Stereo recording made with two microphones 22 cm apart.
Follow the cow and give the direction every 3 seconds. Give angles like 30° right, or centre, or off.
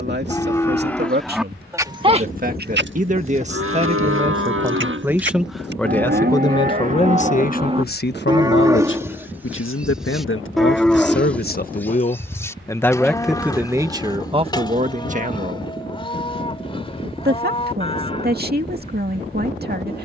10° right, 60° right, 30° right, centre, 20° left, 20° left, 30° left.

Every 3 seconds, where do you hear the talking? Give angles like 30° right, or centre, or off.
50° right, 20° right, 40° left, 60° left, 10° right, 40° right, 50° right.